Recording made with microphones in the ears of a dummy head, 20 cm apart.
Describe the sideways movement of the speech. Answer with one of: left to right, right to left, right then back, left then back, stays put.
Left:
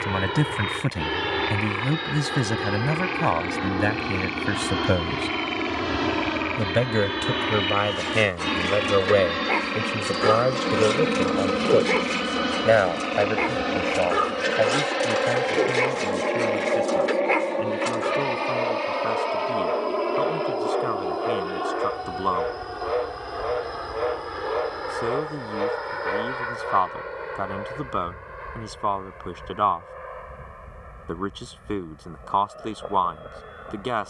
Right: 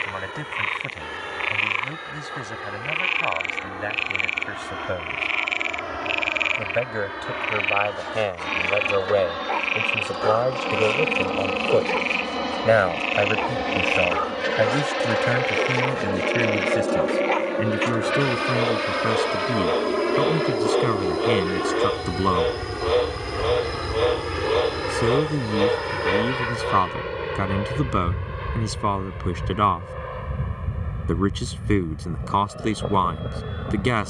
left to right.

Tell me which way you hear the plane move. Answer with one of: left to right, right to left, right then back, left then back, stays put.
left to right.